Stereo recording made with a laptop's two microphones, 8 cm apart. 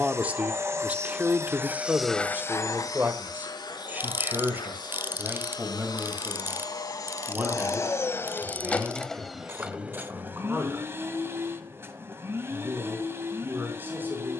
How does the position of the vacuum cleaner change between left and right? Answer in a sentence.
You can hear the vacuum cleaner go left and come back.